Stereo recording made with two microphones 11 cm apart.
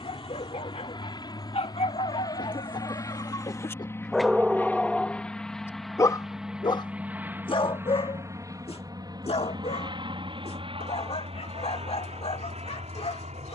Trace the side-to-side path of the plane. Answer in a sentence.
You can hear the plane move from left to right.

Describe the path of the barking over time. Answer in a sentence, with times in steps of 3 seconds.
You can hear the barking on the left from 0 s, in the centre from 3 s and on the left from 6 s.